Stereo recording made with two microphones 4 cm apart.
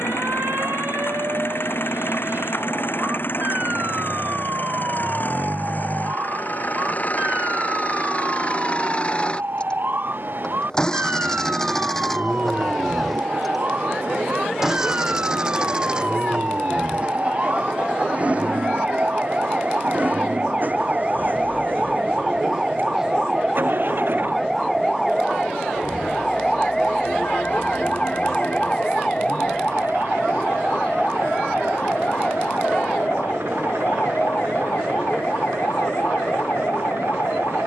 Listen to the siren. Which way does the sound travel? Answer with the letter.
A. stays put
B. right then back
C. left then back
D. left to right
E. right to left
E.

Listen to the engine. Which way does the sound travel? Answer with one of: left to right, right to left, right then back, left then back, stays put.
left to right.